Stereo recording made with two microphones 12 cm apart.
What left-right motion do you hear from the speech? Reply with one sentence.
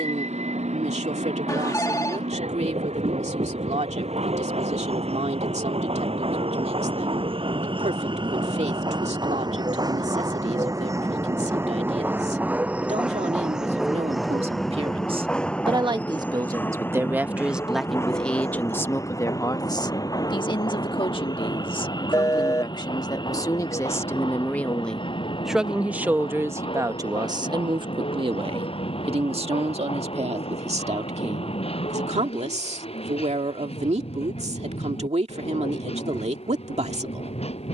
You can hear the speech move from right to left and back again.